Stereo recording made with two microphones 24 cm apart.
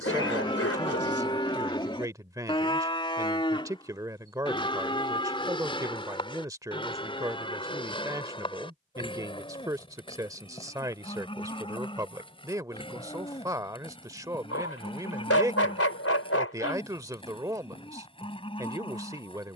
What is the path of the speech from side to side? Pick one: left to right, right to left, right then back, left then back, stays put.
stays put.